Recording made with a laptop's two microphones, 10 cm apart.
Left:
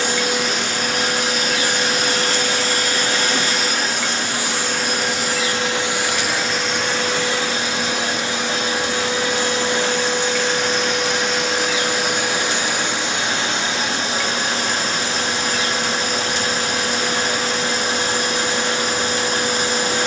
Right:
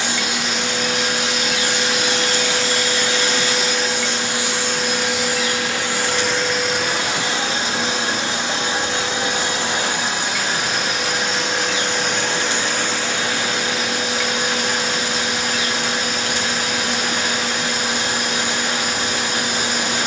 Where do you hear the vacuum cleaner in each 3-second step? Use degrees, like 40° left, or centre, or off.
40° left, 40° left, 20° right, 10° right, 20° left, 30° left, 30° left.